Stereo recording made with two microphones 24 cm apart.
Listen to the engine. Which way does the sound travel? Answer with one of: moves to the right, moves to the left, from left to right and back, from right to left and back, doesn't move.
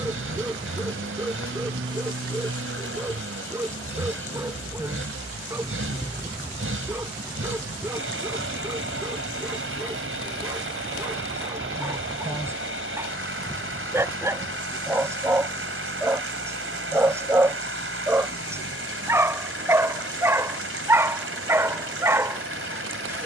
doesn't move.